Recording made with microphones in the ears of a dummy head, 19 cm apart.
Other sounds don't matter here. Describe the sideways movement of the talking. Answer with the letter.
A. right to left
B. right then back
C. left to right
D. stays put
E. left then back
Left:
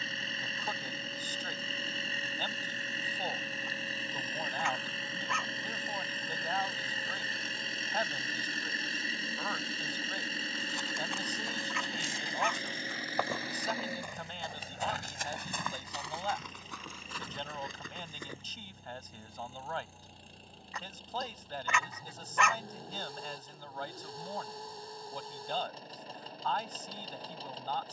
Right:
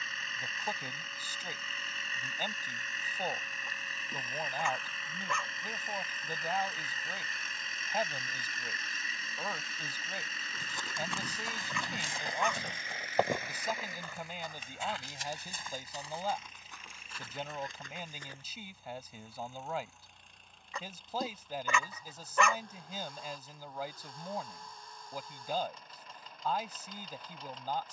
D.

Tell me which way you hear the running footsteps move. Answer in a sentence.
In this clip you hear the running footsteps travel towards the left.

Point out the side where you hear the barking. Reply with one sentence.
In this clip you hear the barking on the right.